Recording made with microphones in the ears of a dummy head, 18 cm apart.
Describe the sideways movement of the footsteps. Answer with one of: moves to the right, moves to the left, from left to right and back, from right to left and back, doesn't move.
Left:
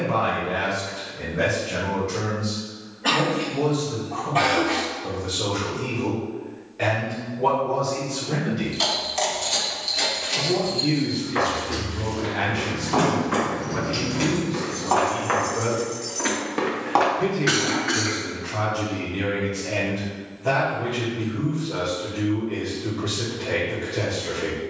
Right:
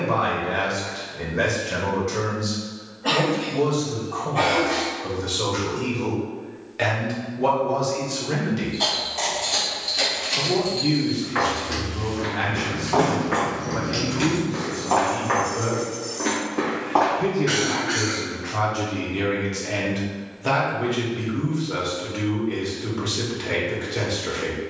moves to the left.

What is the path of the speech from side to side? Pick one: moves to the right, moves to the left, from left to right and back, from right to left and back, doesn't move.
from right to left and back.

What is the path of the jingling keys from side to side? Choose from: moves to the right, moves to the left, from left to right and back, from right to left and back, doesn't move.
from left to right and back.